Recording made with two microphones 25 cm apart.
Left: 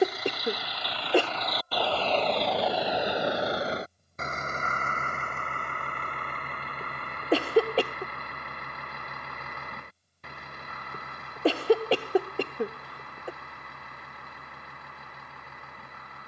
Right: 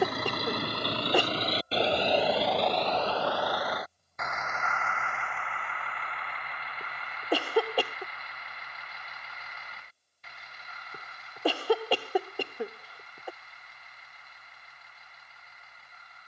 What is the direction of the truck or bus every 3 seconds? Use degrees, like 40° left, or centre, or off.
30° right, 30° left, 50° left, 60° left, 60° left, 60° left.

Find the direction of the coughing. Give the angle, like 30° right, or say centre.
20° left.